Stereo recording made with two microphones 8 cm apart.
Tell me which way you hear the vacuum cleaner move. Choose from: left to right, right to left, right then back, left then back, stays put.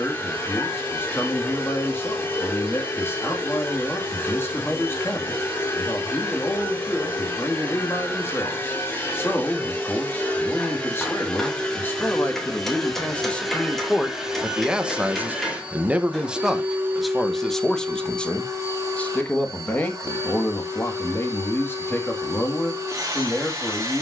left to right.